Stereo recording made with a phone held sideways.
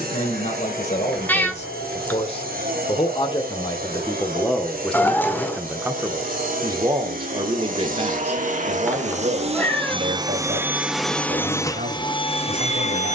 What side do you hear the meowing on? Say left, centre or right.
centre.